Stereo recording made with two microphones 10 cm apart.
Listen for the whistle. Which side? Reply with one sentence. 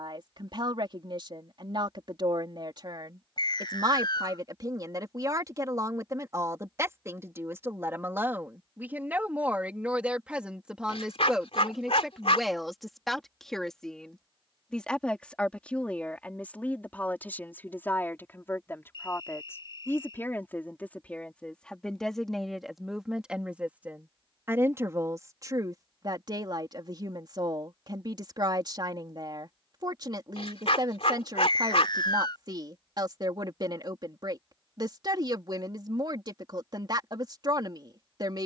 You can hear the whistle on the left.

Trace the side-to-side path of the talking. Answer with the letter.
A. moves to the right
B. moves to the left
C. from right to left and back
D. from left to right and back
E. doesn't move
C.